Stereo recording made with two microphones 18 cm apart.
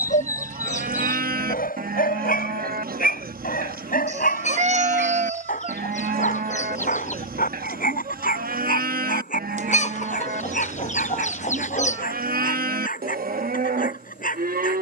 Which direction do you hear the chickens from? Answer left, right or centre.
left.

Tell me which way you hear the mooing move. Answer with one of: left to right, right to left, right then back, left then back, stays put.
stays put.